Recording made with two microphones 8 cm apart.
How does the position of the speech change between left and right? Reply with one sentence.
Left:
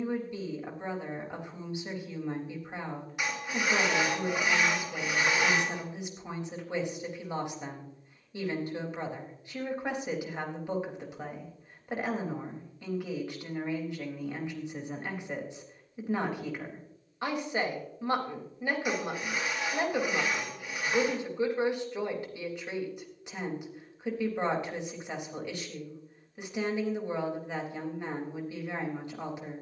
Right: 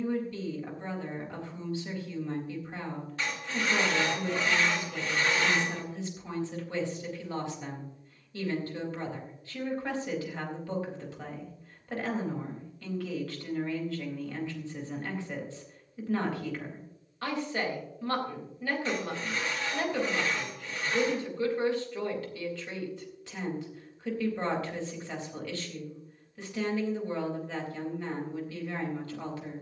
You can hear the speech stay in one place.